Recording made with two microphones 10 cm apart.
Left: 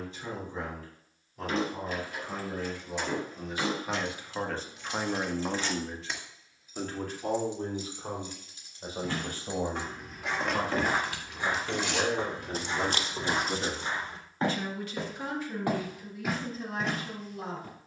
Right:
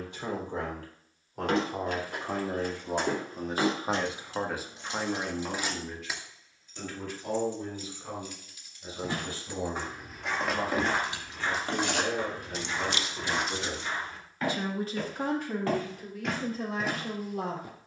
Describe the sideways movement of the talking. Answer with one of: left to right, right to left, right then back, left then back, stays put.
left then back.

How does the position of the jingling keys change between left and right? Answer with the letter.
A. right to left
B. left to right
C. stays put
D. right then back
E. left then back
E.